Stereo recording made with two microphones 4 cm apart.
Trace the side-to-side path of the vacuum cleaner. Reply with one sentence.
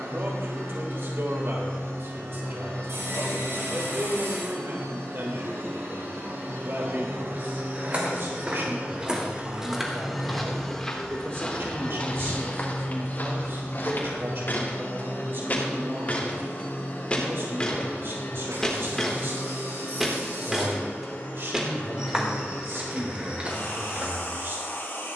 In this clip you hear the vacuum cleaner travel towards the left.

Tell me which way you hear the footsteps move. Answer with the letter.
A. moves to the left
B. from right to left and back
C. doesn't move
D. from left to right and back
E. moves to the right
B.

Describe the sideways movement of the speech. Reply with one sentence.
In this clip you hear the speech stay in one place.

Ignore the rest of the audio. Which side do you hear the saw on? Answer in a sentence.
In this clip you hear the saw on the right.